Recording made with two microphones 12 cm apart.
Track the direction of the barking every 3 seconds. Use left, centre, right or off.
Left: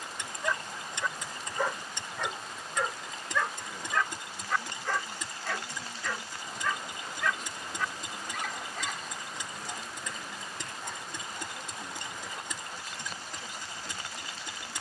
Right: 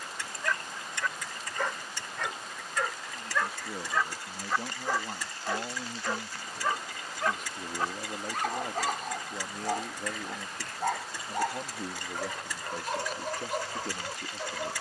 centre, centre, right, right, right.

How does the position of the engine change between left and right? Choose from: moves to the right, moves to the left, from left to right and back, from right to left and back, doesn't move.
doesn't move.